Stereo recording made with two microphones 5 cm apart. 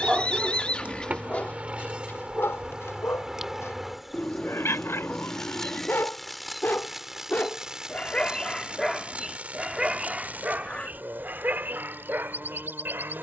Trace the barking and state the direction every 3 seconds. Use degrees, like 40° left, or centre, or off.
20° left, 60° left, 30° left, 30° right, 50° right.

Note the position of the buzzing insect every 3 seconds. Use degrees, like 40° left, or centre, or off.
30° right, centre, 10° right, 40° right, 50° right.